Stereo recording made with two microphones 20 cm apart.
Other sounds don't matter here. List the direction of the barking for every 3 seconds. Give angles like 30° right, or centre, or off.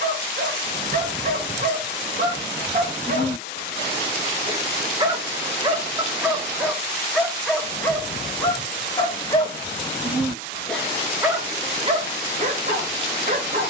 50° right, 30° right, centre, centre, 40° right.